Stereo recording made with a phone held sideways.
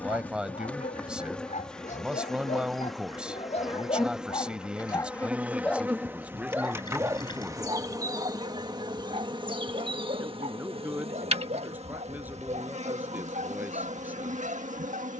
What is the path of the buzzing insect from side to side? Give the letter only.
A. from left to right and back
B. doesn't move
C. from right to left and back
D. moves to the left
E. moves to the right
E.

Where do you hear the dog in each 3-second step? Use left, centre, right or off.
left, left, right, right, right.